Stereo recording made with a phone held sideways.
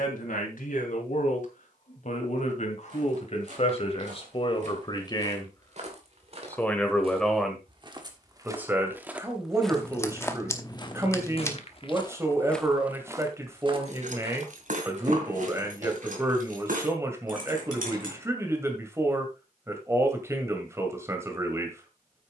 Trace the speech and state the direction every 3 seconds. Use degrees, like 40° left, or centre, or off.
60° left, 40° left, centre, 20° right, 20° right, 20° right, 20° right, 20° right.